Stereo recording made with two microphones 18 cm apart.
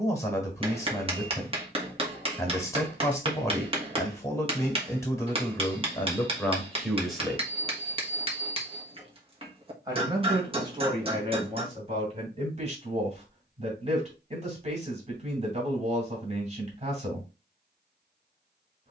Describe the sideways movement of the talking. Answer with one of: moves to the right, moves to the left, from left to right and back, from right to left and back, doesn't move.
moves to the right.